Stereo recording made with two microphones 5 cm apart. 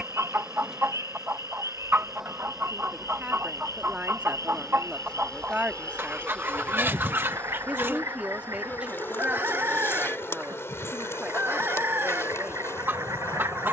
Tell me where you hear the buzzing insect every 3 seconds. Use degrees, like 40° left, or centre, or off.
10° right, 10° left, 30° left, 60° left, 70° left.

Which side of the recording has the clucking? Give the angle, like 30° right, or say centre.
50° right.